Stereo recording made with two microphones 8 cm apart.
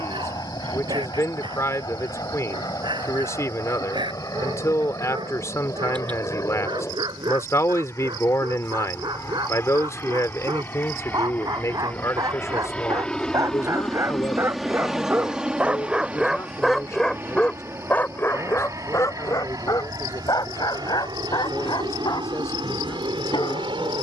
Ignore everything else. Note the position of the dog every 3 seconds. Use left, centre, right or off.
right, right, right, right, right, centre, left, left.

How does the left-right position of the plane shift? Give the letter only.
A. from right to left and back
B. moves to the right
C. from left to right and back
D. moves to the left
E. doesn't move
B.